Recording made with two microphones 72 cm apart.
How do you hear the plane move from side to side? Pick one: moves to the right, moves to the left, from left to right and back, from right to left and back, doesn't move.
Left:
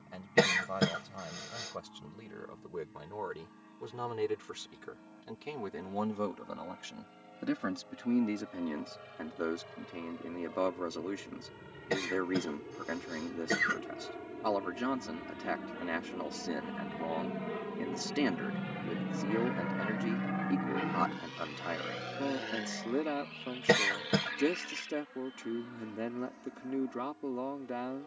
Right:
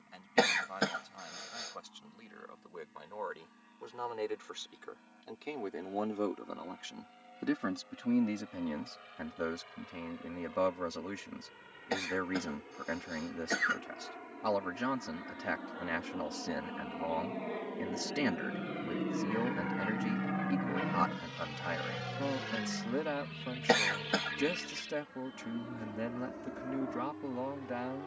moves to the right.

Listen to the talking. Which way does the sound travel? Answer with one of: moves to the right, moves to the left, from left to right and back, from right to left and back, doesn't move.
moves to the right.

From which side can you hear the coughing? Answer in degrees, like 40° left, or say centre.
50° left.